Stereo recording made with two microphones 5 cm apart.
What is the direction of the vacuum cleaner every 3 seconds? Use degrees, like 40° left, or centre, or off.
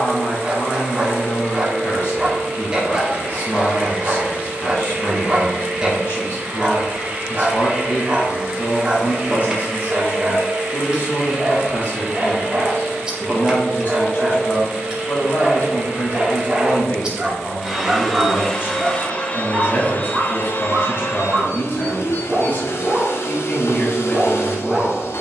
30° right, 30° right, 30° right, 30° right, 30° right, 20° right, 30° left, 60° left, 60° left.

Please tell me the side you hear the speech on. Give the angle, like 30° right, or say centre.
40° left.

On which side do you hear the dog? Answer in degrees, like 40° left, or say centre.
20° right.